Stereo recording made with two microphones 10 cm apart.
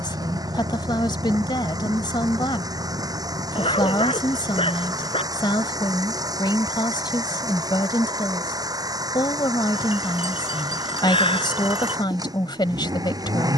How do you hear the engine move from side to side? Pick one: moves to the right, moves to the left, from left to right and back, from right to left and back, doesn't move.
doesn't move.